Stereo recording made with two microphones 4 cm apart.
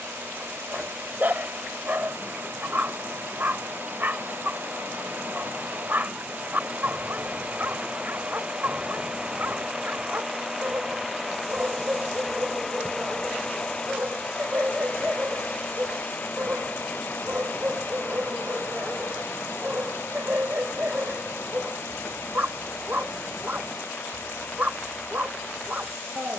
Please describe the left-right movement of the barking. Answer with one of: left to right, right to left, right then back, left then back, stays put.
stays put.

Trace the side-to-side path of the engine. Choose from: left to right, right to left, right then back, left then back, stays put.
right to left.